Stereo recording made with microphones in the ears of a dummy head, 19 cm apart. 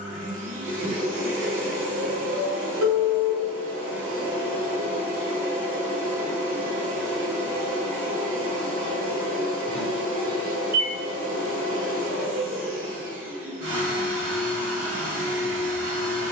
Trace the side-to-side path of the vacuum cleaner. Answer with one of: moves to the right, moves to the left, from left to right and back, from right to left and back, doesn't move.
doesn't move.